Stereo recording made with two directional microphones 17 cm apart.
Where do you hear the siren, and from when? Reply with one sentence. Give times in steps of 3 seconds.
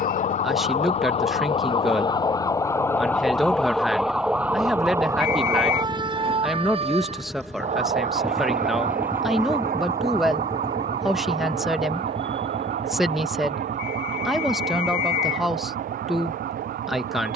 You can hear the siren on the left from 0 s, in the centre from 3 s and on the right from 6 s.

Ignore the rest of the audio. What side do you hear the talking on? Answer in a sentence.
In this clip you hear the talking in the centre.